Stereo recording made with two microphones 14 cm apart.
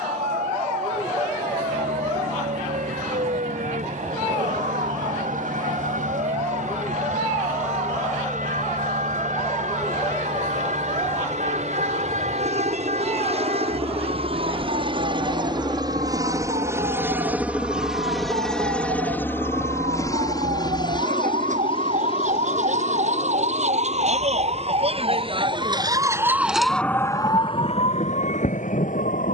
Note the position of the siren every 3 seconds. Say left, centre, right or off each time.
right, right, right, right, right, right, right, right, right, left.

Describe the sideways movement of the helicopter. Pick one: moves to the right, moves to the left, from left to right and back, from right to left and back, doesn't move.
moves to the left.